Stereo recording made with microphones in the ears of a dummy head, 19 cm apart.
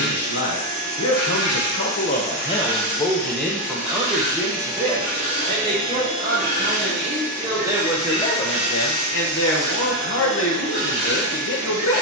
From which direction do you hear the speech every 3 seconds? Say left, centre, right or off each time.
left, centre, centre, left.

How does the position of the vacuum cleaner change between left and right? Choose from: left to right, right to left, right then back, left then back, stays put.
left to right.